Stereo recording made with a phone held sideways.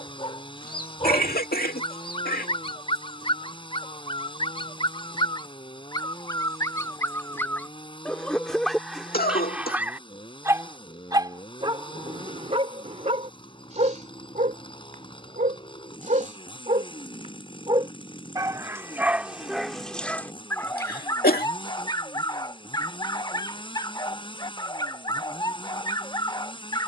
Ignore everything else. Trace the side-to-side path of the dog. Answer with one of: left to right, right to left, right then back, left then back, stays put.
right then back.